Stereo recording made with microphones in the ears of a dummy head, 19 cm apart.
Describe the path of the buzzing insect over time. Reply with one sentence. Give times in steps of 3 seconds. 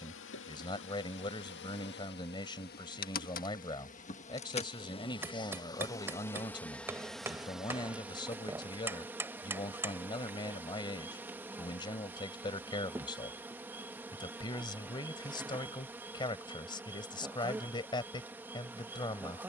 You can hear the buzzing insect on the left from 0 s and in the centre from 6 s.